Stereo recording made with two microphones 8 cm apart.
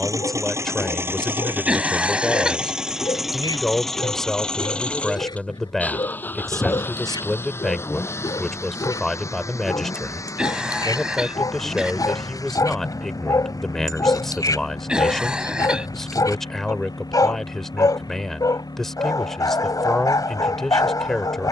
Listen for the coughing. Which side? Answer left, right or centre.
centre.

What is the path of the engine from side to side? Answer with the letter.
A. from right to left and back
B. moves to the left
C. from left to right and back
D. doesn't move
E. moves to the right
B.